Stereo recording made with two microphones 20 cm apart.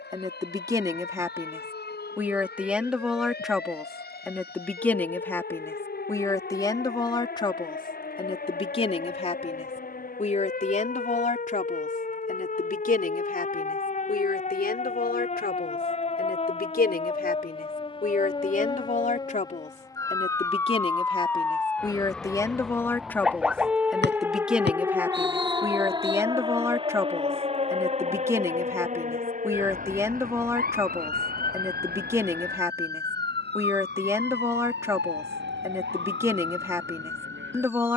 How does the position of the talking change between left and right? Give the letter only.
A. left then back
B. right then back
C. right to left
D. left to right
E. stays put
A.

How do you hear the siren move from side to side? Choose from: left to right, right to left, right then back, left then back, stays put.
left to right.